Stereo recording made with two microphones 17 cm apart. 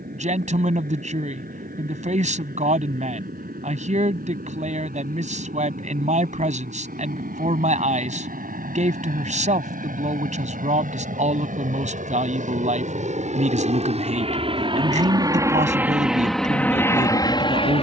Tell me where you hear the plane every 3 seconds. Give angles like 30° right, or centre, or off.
80° right, 70° right, 70° right, 60° right, 50° right, centre.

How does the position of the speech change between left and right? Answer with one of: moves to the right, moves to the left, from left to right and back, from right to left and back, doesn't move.
doesn't move.